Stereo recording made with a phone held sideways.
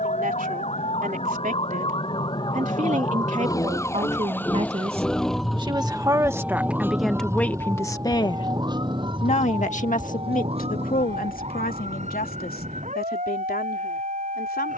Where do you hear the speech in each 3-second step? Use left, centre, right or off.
right, right, centre, left, left.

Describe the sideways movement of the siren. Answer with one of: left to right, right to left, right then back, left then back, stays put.
left to right.